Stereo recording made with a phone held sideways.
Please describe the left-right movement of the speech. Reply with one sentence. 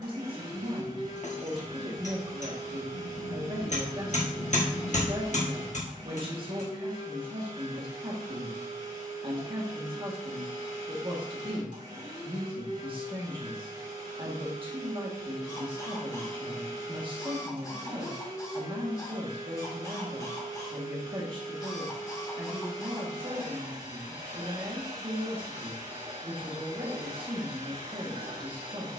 In this clip you hear the speech stay in one place.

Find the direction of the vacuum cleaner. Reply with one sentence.
You can hear the vacuum cleaner on the right.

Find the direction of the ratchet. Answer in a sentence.
You can hear the ratchet on the left.